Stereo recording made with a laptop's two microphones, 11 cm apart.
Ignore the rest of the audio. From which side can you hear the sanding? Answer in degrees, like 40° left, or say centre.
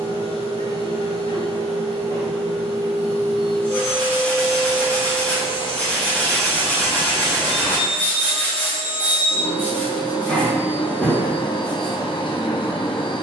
10° left.